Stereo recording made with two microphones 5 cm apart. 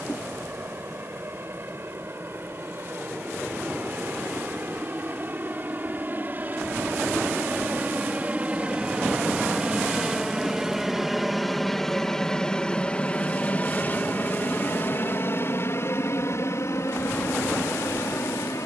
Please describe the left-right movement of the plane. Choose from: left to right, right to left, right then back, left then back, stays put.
right to left.